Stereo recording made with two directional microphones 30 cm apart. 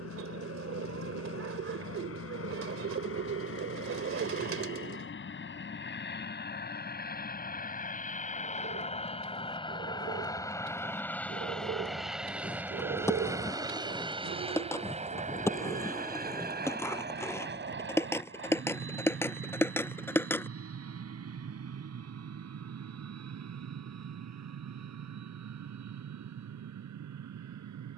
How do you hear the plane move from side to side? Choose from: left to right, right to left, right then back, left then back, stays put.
left to right.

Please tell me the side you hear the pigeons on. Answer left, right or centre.
right.